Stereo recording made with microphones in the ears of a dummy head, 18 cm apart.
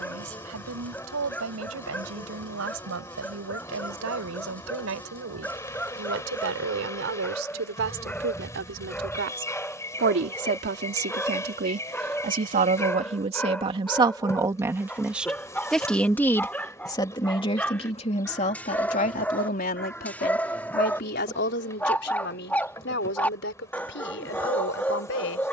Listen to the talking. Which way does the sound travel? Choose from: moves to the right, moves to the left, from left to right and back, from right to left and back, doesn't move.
moves to the left.